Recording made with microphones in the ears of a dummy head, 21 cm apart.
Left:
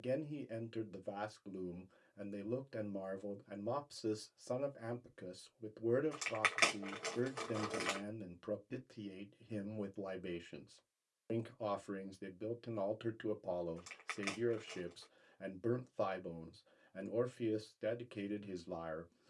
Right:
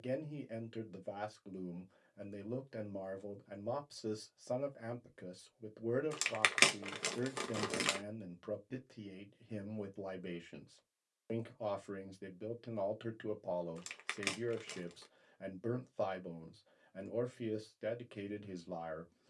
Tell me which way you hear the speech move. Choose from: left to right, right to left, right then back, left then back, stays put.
stays put.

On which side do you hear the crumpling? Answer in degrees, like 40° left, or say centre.
50° right.